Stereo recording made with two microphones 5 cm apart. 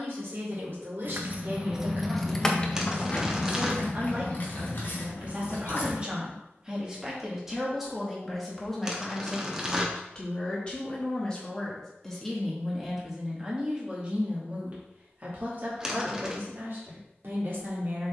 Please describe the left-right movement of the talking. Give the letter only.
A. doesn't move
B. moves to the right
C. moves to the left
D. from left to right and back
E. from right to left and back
E.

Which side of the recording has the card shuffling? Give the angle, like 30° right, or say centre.
10° right.